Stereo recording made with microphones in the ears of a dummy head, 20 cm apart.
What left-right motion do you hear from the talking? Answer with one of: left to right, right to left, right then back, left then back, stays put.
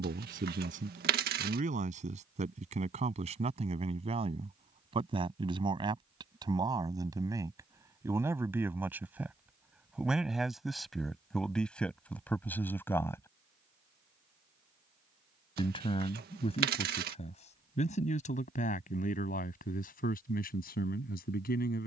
right to left.